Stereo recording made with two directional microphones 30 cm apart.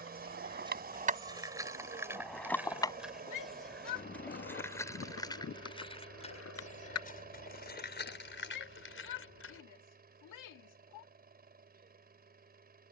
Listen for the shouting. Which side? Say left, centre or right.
left.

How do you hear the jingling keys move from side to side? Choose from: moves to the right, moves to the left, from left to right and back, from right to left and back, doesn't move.
moves to the left.